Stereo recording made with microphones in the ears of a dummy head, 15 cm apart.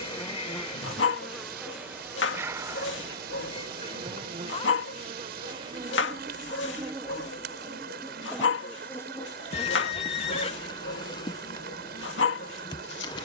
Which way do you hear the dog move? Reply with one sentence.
In this clip you hear the dog stay put.